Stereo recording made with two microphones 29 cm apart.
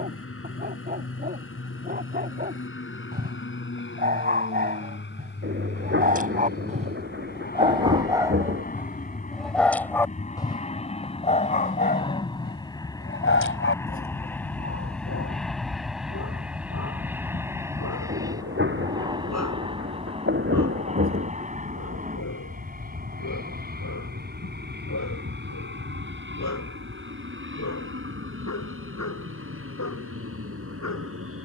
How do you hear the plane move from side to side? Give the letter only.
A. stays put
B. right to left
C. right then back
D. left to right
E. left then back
D.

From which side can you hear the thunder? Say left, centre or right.
right.